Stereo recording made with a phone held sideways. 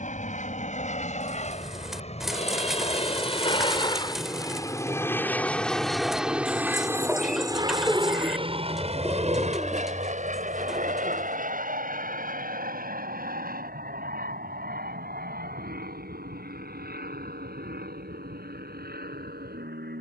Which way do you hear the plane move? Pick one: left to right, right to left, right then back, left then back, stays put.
left to right.